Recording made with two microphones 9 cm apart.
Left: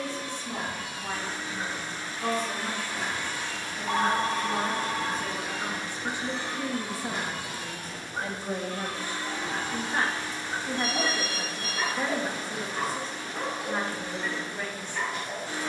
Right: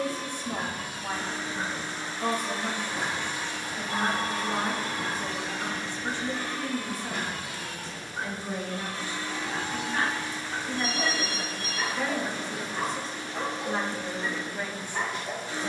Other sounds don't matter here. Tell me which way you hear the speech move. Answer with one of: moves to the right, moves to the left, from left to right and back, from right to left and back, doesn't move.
from right to left and back.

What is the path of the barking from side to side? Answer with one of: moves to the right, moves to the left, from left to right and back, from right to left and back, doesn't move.
from right to left and back.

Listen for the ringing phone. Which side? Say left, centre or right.
left.